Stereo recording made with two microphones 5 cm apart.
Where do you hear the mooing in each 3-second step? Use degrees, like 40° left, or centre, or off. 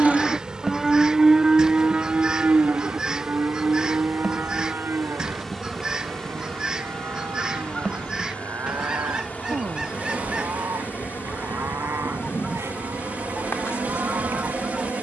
20° right, 50° right, 60° right, 70° right, 70° right.